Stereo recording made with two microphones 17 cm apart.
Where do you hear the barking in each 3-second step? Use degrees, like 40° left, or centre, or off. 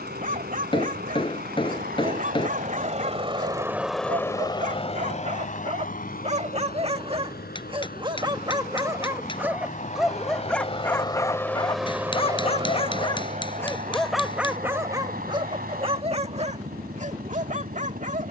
50° right, 50° right, 30° right, centre, 10° left, 40° right.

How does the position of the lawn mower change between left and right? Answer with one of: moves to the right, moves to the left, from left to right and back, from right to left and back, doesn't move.
from right to left and back.